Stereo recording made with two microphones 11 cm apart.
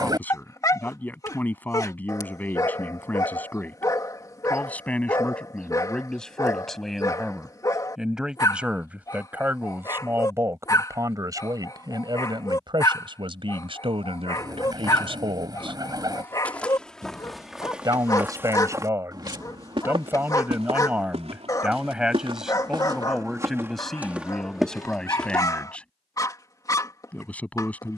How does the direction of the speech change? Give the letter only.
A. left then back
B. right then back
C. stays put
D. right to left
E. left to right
B.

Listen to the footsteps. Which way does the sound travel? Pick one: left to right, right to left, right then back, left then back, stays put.
right then back.